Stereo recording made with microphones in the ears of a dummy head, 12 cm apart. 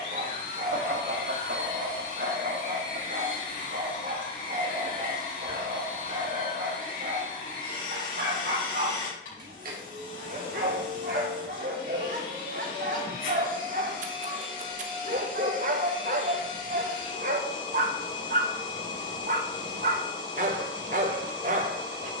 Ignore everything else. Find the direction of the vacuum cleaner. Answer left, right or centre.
left.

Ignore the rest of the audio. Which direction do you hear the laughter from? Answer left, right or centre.
right.